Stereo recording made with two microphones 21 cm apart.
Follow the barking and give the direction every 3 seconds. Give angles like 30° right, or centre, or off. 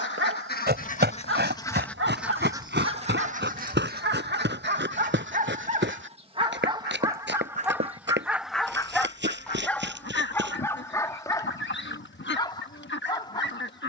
60° right, 50° right, 10° right, 10° left, 20° left.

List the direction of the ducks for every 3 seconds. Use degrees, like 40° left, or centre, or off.
20° left, 50° right, 20° right, 50° left, 60° left.